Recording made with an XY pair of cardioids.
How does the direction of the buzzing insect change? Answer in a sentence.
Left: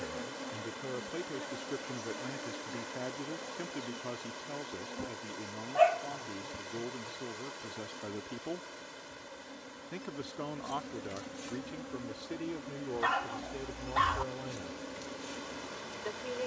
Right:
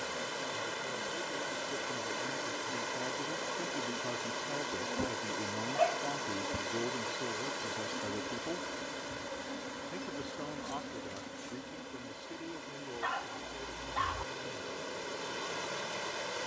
In this clip you hear the buzzing insect go right and come back.